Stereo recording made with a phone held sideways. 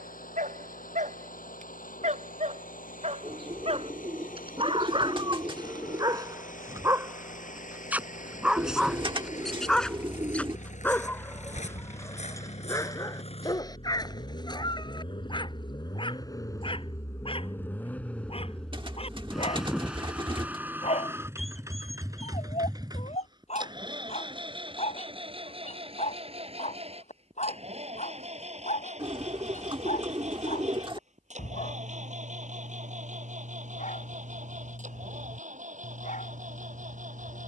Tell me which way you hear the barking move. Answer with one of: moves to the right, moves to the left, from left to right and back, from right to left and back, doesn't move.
moves to the left.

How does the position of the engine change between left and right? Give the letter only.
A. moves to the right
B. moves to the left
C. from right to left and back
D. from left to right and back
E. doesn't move
A.